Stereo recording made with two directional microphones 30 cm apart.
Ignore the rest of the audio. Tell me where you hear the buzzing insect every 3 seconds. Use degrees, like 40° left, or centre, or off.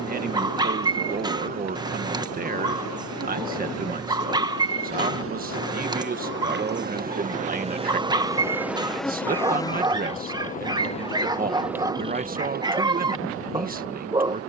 60° right, 50° right, 20° right, 10° left, 40° right.